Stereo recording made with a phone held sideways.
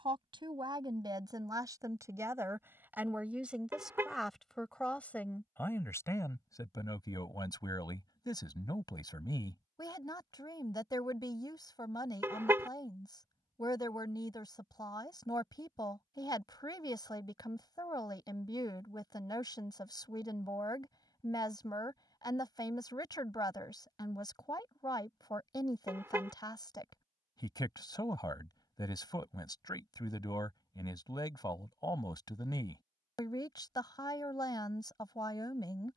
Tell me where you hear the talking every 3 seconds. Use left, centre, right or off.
right, centre, left, left, left, left, left, left, left, left, left, left.